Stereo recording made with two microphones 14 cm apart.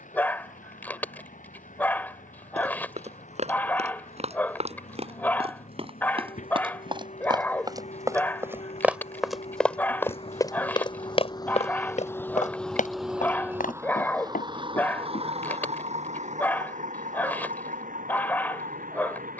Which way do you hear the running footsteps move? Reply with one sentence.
You can hear the running footsteps travel towards the left.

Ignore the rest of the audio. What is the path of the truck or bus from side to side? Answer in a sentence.
You can hear the truck or bus go from the left side to the right.